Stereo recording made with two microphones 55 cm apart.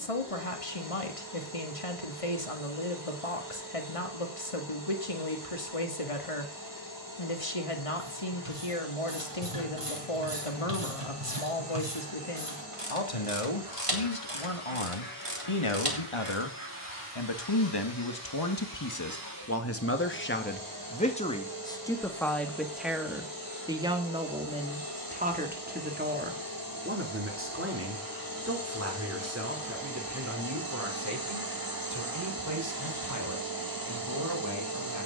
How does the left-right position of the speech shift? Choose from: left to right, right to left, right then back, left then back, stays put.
left to right.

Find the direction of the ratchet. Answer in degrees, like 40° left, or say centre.
70° right.